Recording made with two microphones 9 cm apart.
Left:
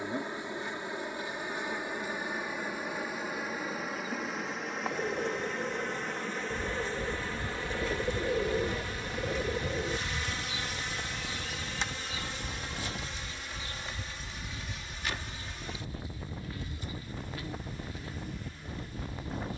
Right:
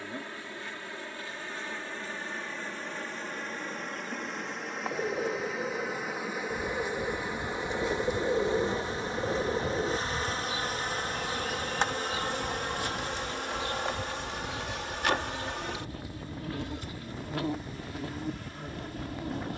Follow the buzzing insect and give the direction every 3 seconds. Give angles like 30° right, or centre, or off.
20° left, centre, 20° right, 40° right, 60° right, 70° right, 80° right.